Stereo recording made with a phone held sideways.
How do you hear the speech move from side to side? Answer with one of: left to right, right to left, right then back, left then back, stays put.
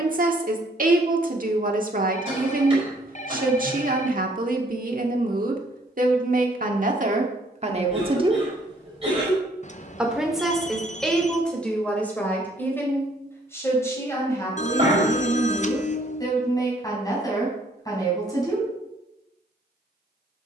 right to left.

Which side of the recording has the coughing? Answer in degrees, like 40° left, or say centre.
30° right.